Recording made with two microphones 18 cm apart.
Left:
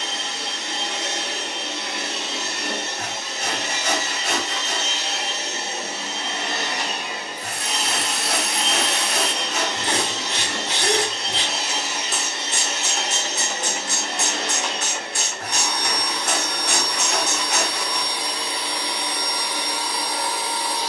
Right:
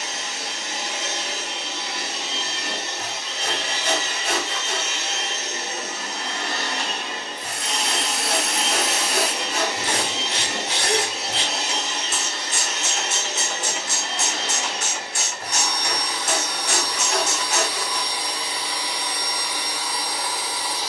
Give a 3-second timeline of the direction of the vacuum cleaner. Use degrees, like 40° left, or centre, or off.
60° left, 40° left, 10° left, 10° right, 40° left, 50° left, 50° left.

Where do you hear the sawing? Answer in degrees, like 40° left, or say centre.
80° left.